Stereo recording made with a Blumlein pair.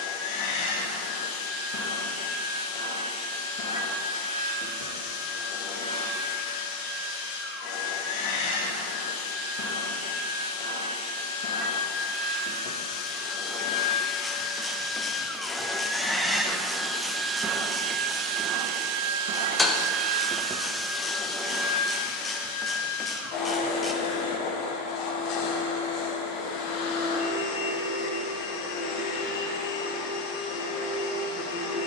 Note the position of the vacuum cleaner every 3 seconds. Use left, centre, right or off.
left, left, left, left, left, centre, right, left, left, left, left.